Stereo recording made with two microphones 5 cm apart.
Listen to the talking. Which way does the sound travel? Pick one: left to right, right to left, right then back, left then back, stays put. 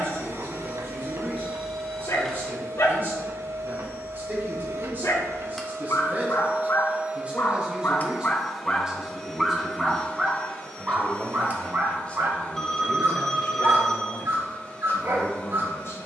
right to left.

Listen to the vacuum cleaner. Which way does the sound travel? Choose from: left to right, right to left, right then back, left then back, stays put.
right to left.